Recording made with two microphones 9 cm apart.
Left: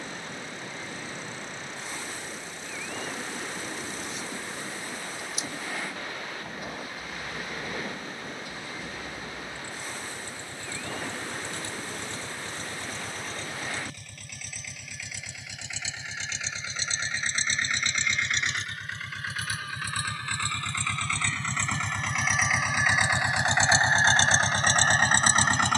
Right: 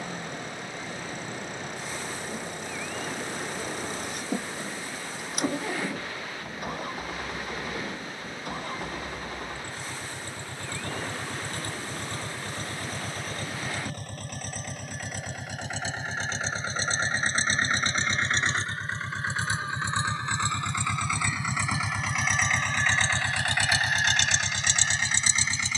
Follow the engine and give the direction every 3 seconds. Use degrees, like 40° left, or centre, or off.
60° right, 60° right, 50° right, 50° right, 50° right, 40° right, 30° right, centre, 40° left.